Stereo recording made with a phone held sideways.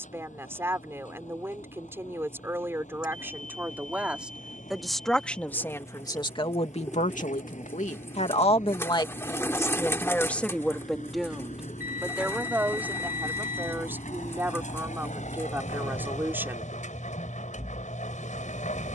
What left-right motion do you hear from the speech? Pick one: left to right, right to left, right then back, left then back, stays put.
left then back.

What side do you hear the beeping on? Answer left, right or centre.
left.